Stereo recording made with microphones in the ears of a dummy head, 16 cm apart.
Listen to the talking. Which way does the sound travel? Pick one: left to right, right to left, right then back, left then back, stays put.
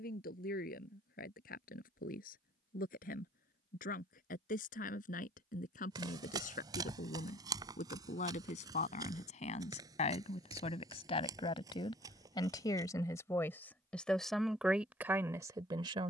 left to right.